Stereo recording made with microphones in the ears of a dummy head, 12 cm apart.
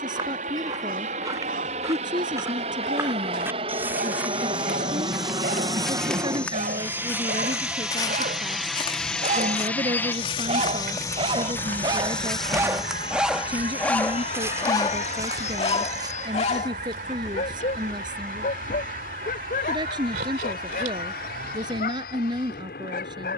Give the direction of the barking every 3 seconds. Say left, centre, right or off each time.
right, right, right, right, centre, left, left, left.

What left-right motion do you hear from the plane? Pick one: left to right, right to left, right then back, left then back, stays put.
right to left.